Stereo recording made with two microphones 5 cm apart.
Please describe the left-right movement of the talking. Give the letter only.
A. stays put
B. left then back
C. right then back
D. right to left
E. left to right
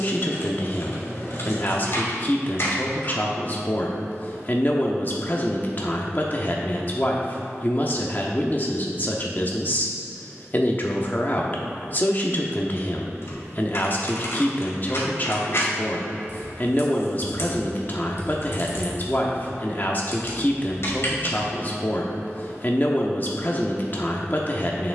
A.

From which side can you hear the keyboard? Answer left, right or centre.
left.